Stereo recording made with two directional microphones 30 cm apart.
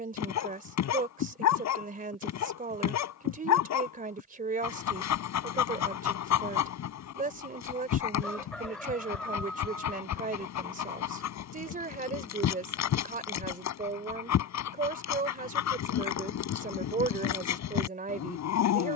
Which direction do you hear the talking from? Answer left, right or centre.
right.